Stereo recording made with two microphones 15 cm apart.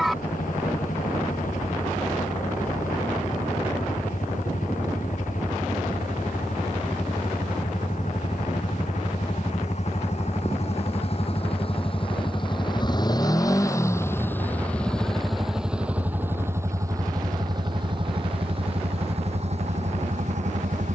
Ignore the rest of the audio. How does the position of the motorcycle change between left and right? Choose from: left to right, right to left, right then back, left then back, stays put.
left to right.